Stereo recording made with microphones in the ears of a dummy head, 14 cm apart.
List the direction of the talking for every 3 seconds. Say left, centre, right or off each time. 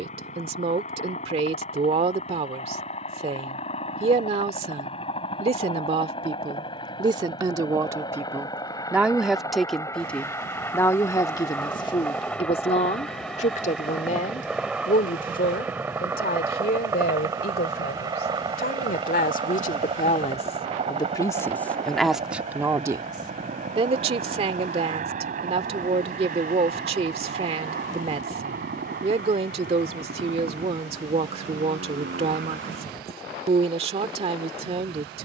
right, right, right, centre, left, left, left, centre, right, right, right, right.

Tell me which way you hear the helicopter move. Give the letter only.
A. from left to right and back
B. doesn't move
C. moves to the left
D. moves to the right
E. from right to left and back
D.